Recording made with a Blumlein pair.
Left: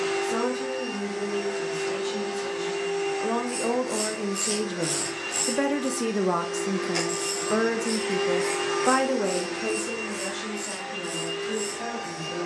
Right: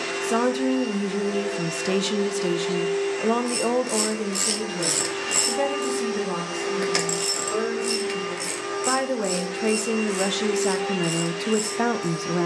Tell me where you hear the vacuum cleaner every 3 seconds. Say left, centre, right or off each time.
right, right, centre, right.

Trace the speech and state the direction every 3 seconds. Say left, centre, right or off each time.
right, centre, left, right.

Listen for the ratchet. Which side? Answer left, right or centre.
right.